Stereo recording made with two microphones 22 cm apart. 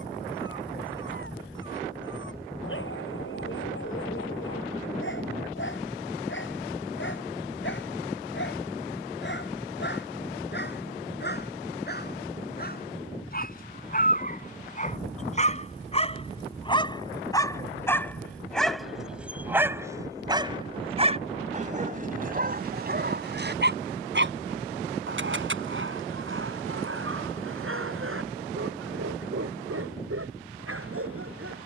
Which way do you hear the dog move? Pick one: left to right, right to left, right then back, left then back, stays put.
left to right.